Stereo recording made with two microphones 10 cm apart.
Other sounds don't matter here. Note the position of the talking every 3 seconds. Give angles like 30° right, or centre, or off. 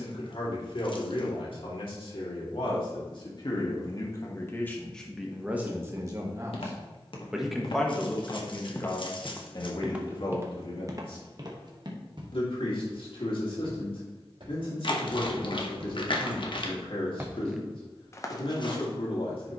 60° left, 20° left, centre, 50° left, 60° left, 60° left, 60° left.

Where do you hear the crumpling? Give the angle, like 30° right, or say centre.
50° left.